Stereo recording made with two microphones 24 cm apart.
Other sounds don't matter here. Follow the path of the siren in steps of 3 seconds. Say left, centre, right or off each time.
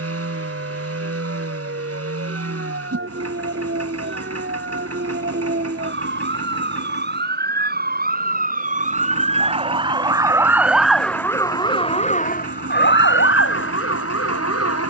right, right, right, centre, left.